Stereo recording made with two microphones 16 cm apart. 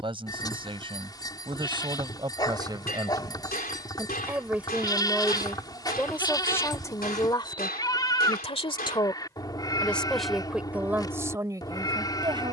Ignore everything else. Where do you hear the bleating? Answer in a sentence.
You can hear the bleating on the left.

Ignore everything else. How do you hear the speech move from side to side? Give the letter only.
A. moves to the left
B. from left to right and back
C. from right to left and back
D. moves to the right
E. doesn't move
C.